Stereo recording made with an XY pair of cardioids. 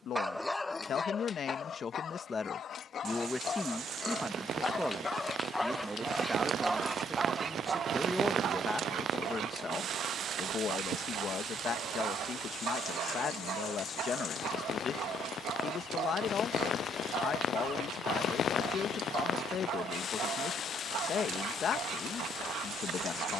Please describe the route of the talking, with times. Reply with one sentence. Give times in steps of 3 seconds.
You can hear the talking on the left from 0 s, in the centre from 3 s and on the left from 9 s.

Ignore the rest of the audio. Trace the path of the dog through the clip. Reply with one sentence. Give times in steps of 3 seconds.
You can hear the dog on the left from 0 s and on the right from 6 s.